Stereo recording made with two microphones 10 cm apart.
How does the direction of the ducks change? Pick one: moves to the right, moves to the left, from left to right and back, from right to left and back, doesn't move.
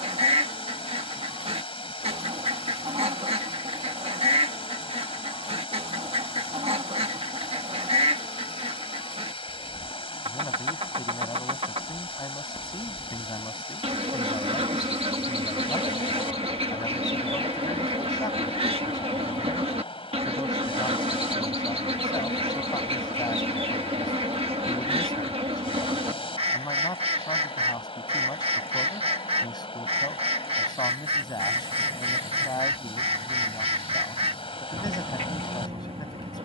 doesn't move.